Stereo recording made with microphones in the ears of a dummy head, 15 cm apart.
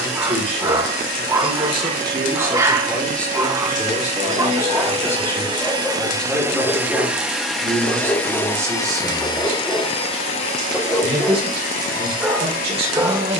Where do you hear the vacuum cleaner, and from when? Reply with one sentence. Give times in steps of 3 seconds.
In this clip you hear the vacuum cleaner on the right from 0 s, in the centre from 6 s and on the left from 9 s.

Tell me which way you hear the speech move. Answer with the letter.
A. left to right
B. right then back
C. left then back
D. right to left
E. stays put
C.